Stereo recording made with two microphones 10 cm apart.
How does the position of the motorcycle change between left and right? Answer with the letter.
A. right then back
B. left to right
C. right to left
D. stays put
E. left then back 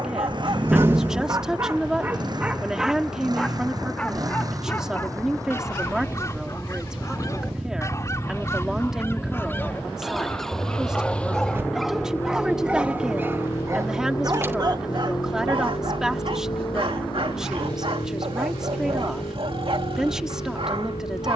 C.